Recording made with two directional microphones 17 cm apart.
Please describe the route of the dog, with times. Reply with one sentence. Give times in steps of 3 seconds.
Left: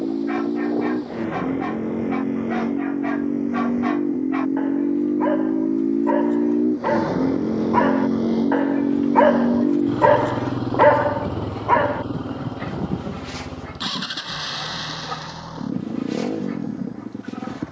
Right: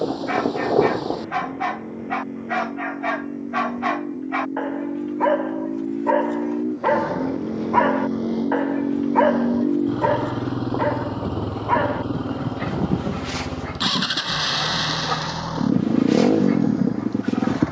In this clip you hear the dog on the right from 0 s, in the centre from 6 s, on the left from 9 s and on the right from 12 s.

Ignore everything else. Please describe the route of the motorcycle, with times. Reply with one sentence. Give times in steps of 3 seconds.
In this clip you hear the motorcycle on the left from 0 s, in the centre from 9 s and on the right from 12 s.